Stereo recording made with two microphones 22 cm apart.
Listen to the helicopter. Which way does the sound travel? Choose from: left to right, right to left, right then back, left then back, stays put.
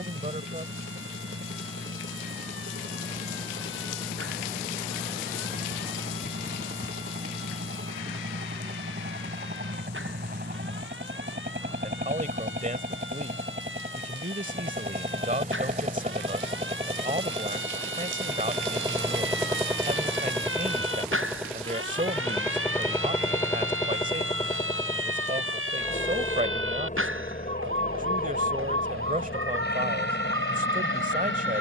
right to left.